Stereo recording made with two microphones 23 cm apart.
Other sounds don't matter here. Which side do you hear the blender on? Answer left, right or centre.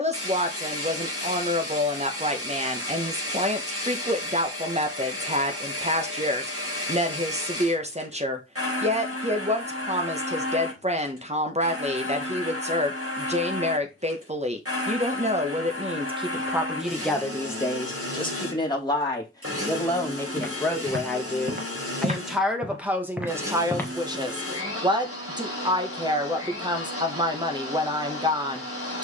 right.